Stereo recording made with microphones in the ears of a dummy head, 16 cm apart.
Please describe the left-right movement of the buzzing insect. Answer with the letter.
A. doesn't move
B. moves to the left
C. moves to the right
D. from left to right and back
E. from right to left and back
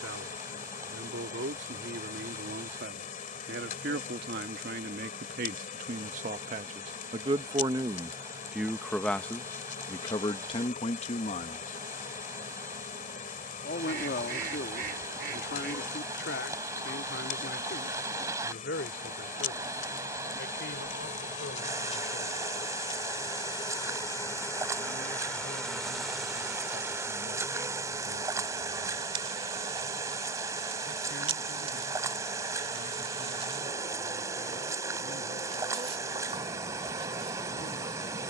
C.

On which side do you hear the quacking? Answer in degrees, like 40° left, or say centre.
60° right.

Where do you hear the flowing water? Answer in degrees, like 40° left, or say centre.
20° right.